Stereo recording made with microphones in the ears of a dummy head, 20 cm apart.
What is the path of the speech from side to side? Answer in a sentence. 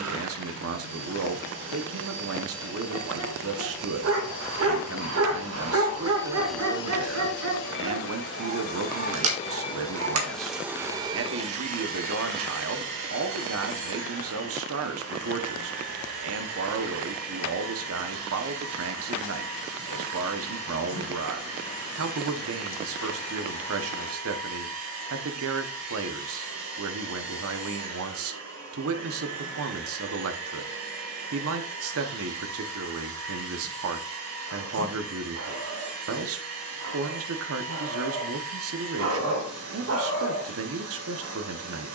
In this clip you hear the speech stay in one place.